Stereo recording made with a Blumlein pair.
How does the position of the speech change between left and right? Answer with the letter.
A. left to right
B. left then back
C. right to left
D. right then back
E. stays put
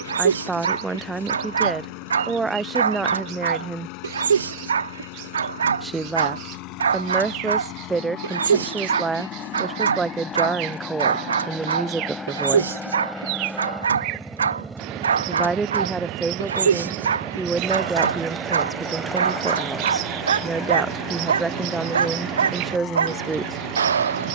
E.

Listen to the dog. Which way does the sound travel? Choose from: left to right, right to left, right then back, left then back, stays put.
stays put.